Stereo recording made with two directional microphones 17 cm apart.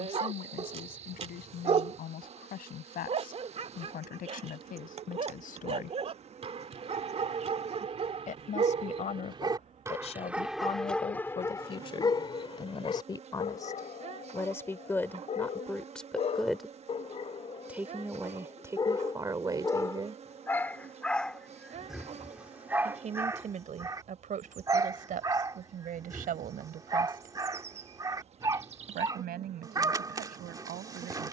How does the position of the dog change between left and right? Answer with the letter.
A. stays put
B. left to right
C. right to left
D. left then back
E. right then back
D.